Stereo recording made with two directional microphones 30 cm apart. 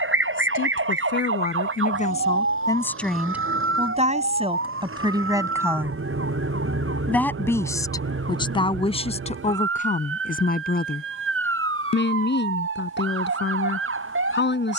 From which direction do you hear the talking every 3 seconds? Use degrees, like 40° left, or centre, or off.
30° left, 10° right, 10° left, 30° left, 30° left.